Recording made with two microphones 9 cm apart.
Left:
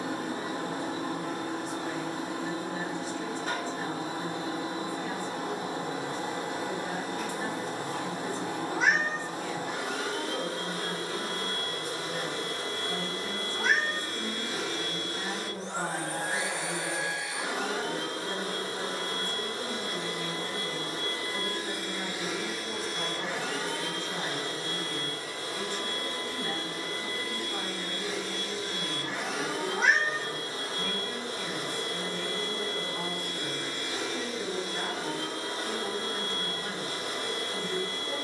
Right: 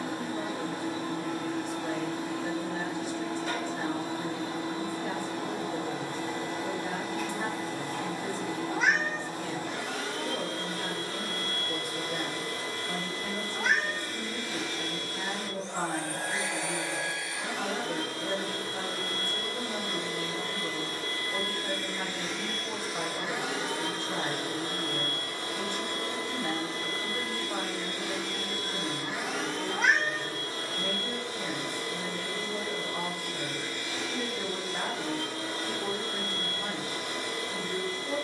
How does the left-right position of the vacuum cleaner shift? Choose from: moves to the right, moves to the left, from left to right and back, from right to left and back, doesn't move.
from left to right and back.